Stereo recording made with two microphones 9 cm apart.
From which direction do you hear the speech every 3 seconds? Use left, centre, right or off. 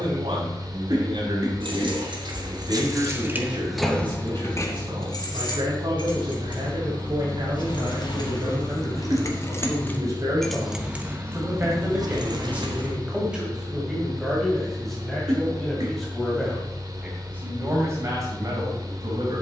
right, right, right, right, centre, centre, right.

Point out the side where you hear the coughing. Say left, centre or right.
right.